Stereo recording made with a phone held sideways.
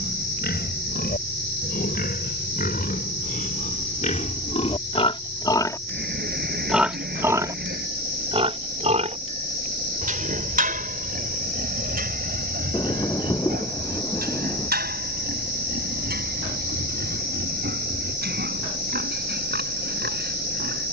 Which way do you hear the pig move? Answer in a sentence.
You can hear the pig move from left to right.